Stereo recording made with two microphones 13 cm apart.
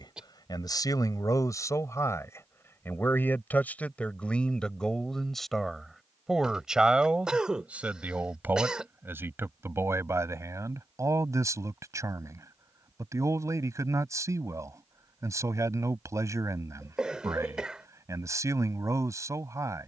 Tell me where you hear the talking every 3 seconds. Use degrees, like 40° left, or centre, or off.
30° left, 10° left, 10° right, 20° right, 20° right, 20° right, 20° right.